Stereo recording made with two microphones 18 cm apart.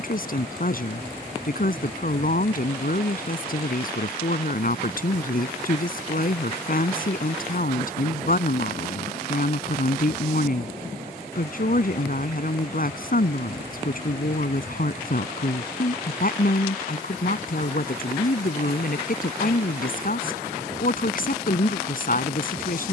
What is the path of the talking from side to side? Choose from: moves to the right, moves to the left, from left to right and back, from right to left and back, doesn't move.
doesn't move.